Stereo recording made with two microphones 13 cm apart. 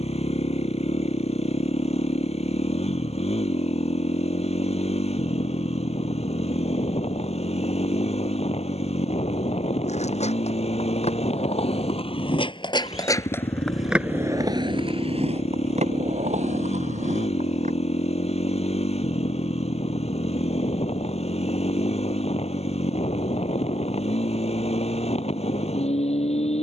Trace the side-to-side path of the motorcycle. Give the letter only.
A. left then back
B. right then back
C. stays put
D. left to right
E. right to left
C.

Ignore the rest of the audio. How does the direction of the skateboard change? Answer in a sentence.
You can hear the skateboard go from the left side to the right.